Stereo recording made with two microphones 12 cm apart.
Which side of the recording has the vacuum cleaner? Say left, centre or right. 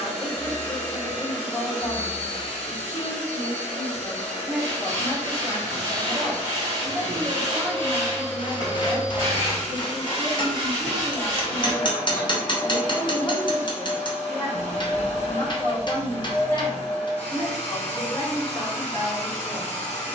left.